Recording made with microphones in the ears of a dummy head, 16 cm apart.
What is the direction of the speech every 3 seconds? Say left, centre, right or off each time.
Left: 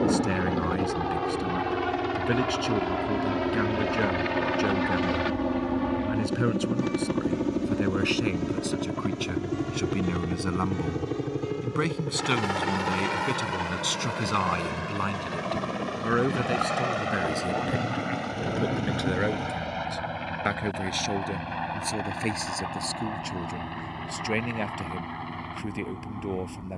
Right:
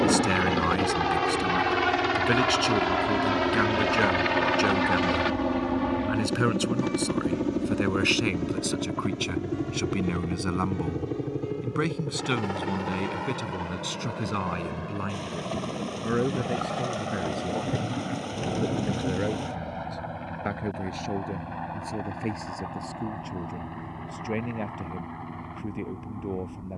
right, right, right, centre, left, left, left, left, left.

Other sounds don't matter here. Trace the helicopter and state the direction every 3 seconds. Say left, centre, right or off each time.
right, right, centre, left, left, left, left, left, left.